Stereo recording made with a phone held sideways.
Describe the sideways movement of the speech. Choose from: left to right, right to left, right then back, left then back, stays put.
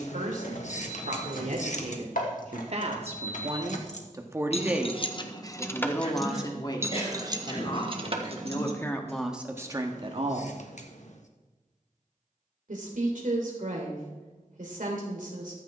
left then back.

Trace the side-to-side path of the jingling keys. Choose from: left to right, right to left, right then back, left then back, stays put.
left to right.